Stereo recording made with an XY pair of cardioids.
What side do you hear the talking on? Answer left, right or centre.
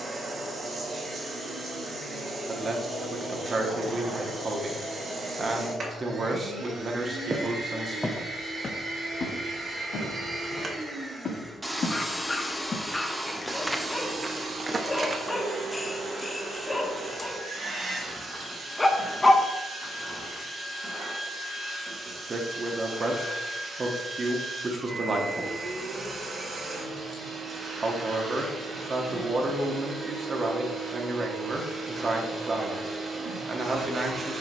right.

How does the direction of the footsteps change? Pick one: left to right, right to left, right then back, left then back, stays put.
left then back.